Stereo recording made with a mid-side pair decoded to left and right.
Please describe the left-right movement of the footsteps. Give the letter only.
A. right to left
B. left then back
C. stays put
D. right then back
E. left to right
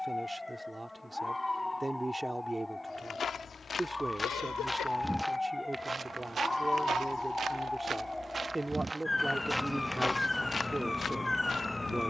D.